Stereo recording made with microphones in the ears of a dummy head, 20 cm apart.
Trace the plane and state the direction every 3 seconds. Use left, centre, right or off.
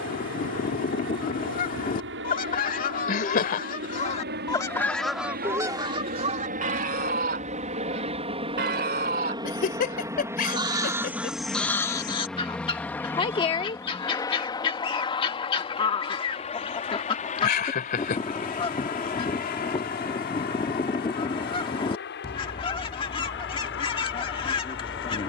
right, right, right, centre, centre, left, left, left, left.